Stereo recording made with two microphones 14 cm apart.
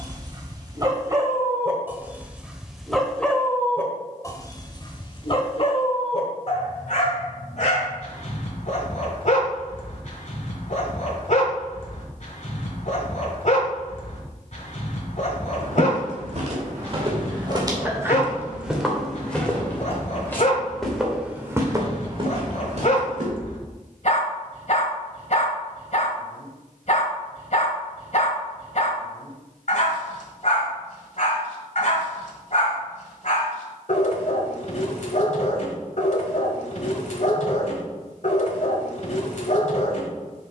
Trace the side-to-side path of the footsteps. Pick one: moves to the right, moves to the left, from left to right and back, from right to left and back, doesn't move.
from right to left and back.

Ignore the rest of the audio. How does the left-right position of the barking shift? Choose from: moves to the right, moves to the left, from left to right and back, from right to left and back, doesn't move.
moves to the left.